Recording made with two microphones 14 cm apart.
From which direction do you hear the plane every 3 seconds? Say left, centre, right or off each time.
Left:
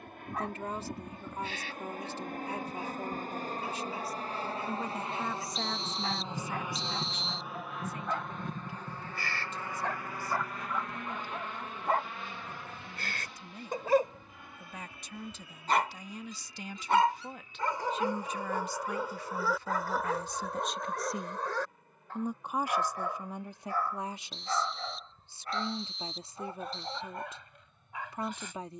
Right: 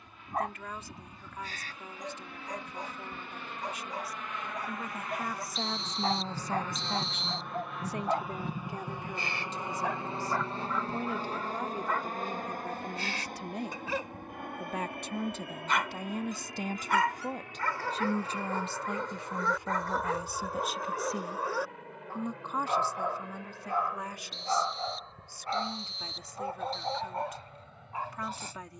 left, left, centre, right, right, right, right, right, right, right.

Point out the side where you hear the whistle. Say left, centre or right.
centre.